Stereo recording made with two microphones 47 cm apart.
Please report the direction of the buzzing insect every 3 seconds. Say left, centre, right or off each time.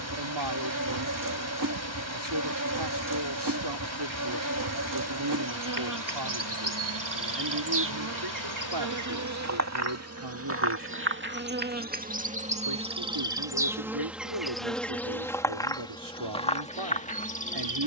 right, right, right, right, centre, centre.